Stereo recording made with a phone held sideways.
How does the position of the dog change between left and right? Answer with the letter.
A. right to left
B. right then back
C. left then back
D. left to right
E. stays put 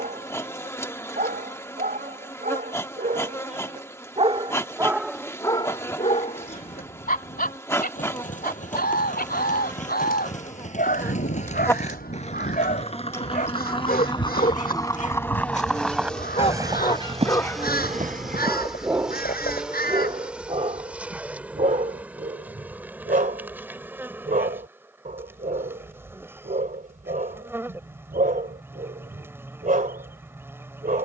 C.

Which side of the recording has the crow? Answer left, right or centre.
left.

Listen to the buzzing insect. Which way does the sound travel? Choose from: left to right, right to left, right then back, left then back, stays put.
left to right.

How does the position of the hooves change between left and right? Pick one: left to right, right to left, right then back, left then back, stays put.
left to right.